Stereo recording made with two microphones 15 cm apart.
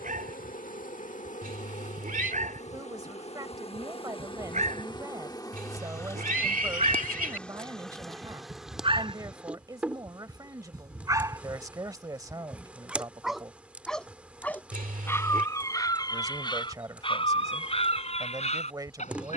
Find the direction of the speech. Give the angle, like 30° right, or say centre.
20° right.